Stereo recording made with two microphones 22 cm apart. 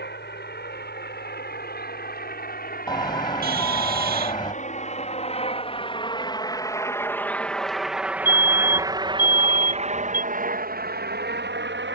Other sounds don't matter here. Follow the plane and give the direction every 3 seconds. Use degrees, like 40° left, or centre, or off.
50° left, 40° left, centre, 40° right.